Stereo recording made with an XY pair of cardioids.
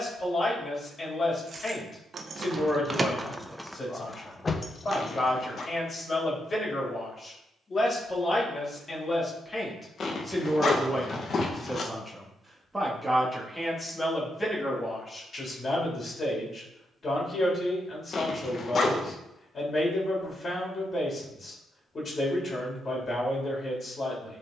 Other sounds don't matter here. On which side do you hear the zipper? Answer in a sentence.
You can hear the zipper on the left.